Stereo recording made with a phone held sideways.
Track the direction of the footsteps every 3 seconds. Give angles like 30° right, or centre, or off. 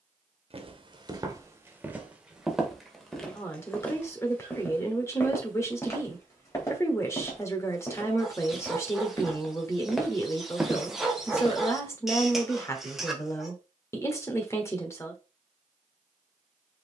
20° right, 10° left, 20° left, 10° right, off, off.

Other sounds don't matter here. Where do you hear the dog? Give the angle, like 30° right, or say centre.
centre.